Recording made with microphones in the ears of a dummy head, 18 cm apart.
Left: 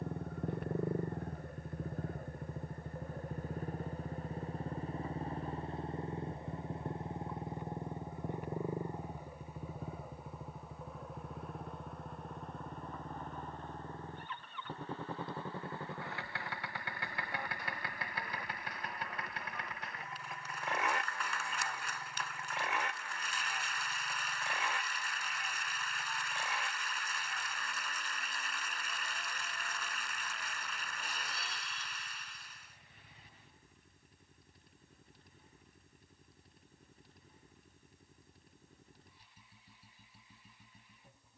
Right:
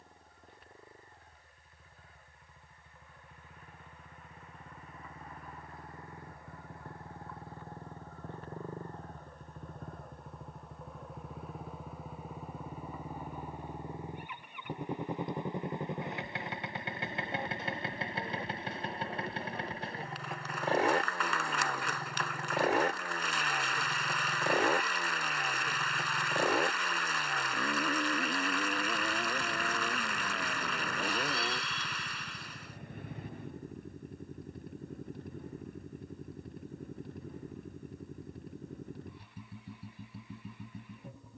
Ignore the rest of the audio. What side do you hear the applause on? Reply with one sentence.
You can hear the applause on the right.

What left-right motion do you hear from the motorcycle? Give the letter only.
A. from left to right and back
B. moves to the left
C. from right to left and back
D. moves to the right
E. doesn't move
D.